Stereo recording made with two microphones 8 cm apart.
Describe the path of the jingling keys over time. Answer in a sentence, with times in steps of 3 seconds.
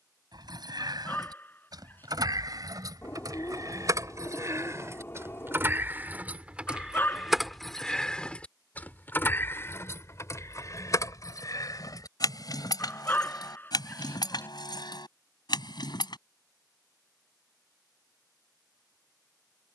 In this clip you hear the jingling keys on the right from 0 s, in the centre from 6 s, on the left from 9 s and not at all from 18 s.